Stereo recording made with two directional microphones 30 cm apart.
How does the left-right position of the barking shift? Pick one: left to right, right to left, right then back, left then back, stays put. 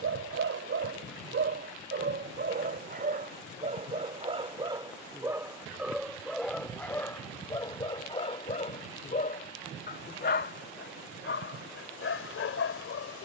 right to left.